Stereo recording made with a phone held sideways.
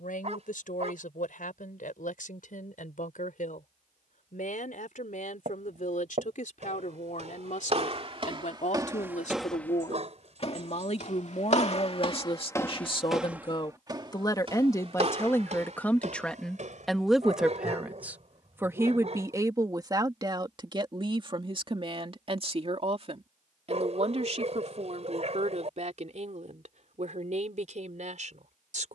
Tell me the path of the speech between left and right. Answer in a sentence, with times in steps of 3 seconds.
You can hear the speech on the left from 0 s, in the centre from 15 s and on the right from 18 s.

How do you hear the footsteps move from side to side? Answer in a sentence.
In this clip you hear the footsteps move from right to left and back again.